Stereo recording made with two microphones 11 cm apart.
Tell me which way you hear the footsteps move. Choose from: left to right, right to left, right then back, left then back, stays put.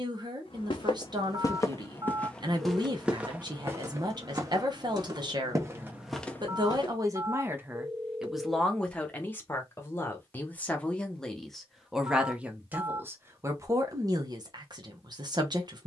right then back.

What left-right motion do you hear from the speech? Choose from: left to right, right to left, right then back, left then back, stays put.
left then back.